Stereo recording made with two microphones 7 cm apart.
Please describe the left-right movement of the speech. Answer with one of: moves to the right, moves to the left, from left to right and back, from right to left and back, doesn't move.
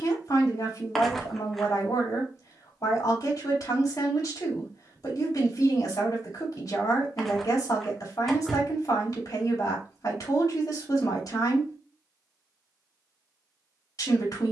doesn't move.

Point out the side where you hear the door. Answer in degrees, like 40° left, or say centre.
centre.